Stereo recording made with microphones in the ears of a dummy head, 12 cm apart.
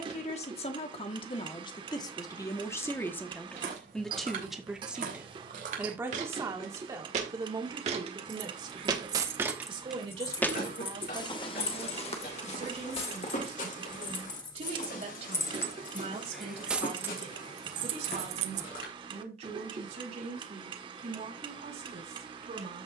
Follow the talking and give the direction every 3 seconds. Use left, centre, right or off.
left, centre, right, right, right, right, right, right.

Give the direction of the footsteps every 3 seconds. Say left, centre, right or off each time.
off, right, right, left, left, left, left, off.